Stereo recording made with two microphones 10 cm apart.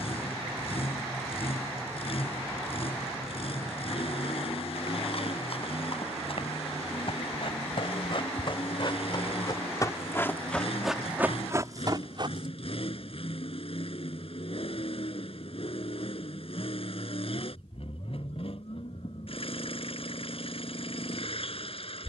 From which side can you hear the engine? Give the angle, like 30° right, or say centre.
70° left.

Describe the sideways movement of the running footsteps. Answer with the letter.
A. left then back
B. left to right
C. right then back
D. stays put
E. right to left
B.